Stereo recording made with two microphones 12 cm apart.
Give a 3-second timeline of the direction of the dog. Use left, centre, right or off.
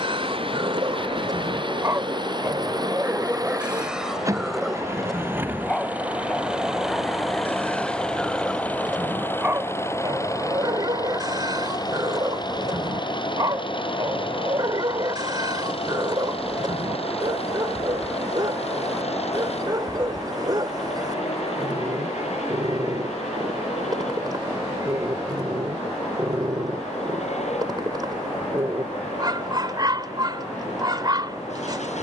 right, centre, centre, right, right, right, right, right, right, right, right.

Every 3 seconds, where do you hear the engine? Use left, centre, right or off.
right, right, centre, left, left, left, left, left, left, left, left.